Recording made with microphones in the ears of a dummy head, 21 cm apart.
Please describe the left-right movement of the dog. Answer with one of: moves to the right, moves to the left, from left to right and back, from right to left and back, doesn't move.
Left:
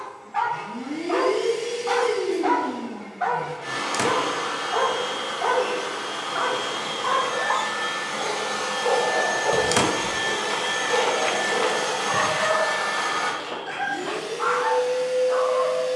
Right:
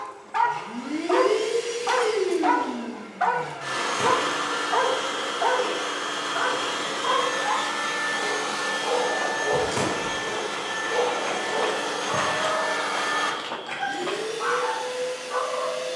moves to the left.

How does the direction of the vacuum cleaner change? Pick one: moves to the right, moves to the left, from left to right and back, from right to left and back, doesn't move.
from right to left and back.